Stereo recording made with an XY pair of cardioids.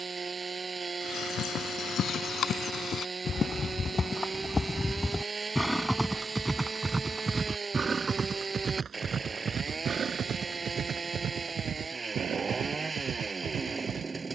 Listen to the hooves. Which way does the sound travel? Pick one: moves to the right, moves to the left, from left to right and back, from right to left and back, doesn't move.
moves to the right.